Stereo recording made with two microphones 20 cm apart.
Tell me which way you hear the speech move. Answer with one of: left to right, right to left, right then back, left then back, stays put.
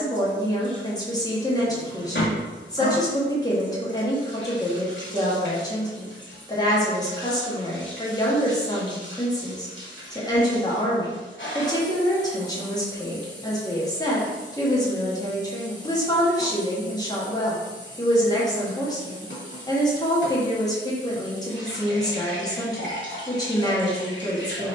stays put.